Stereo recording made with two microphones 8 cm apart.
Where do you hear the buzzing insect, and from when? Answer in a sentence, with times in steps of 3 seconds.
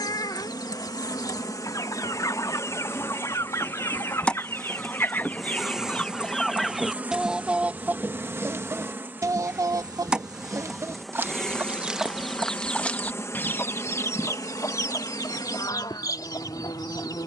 In this clip you hear the buzzing insect on the left from 0 s, in the centre from 3 s, on the right from 6 s, in the centre from 9 s and on the left from 12 s.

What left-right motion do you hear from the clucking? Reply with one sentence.
In this clip you hear the clucking move from left to right and back again.